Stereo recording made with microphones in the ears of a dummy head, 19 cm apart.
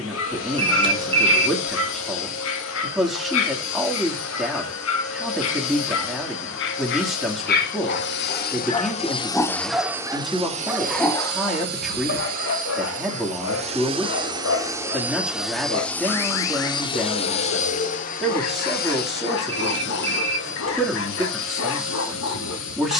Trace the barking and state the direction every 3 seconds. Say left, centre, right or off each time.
left, left, left, centre, left, left, left, left.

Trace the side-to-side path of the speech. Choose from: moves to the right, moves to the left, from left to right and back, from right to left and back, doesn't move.
doesn't move.